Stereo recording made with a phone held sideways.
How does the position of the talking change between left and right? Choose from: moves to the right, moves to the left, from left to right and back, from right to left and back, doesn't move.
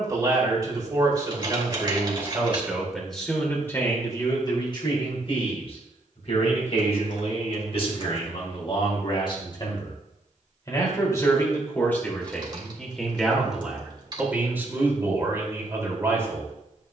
from right to left and back.